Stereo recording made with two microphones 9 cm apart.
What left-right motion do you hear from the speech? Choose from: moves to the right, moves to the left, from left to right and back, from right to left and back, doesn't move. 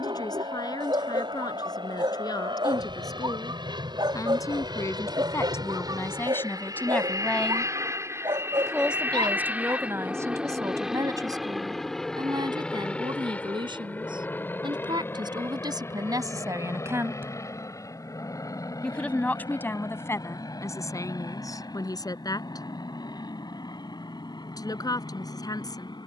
from left to right and back.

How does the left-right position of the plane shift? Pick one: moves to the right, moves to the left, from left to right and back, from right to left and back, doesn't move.
moves to the left.